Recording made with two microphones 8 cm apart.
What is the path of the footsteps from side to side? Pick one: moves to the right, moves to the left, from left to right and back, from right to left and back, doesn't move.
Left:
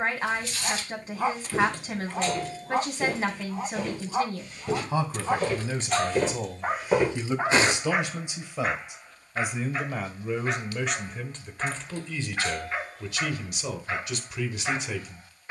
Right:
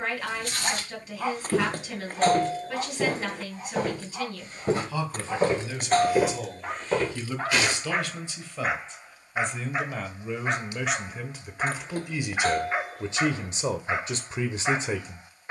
moves to the left.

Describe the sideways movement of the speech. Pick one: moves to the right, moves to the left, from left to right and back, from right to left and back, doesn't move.
moves to the right.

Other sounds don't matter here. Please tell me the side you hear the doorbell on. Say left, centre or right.
right.